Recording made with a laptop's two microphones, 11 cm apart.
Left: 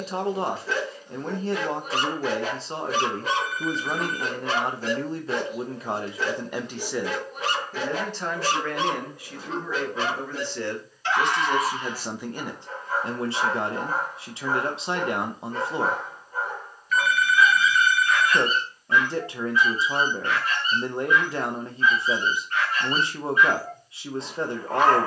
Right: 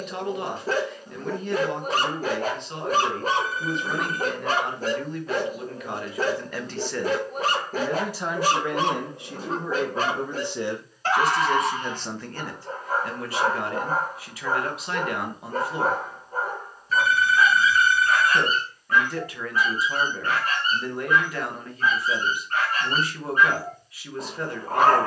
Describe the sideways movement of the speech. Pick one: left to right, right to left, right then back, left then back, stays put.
right then back.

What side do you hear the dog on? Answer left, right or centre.
right.